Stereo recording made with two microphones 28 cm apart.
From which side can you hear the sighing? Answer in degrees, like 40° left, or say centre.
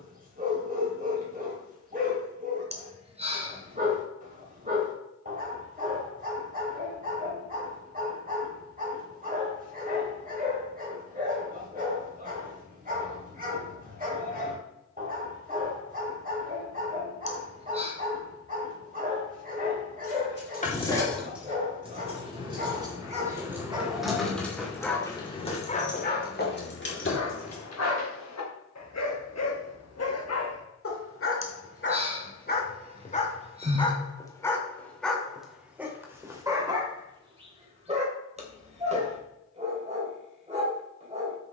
20° right.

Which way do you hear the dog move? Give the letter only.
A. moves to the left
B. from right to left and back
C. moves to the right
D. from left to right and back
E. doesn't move
B.